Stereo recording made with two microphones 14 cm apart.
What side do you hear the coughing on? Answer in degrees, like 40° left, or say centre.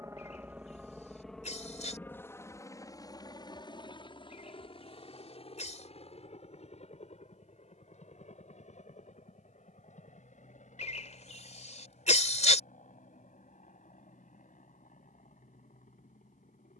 50° left.